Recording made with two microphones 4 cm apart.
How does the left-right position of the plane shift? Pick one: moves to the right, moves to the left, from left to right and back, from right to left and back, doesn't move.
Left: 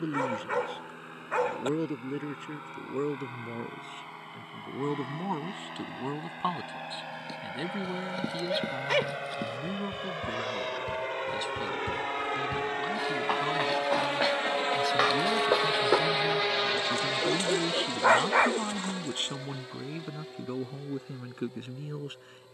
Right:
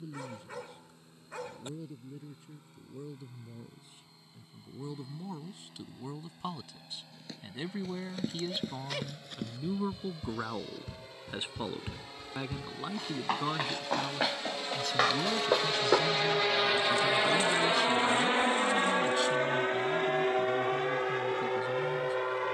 moves to the right.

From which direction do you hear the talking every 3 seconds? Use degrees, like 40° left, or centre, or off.
70° left, 50° left, 20° left, 20° right, 10° right, 20° left, 50° left, 60° left.